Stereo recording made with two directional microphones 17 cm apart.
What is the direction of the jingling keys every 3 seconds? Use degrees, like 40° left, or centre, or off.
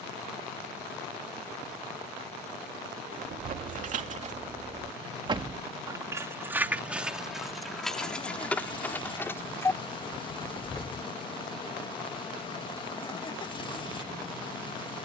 off, 40° right, centre, 20° left, off.